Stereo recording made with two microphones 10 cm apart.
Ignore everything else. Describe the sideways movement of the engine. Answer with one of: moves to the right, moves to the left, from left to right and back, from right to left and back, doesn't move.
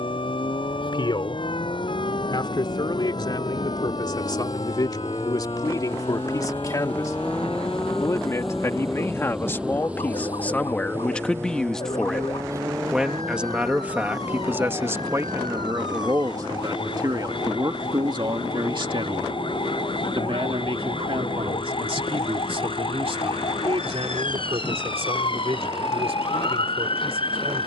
moves to the right.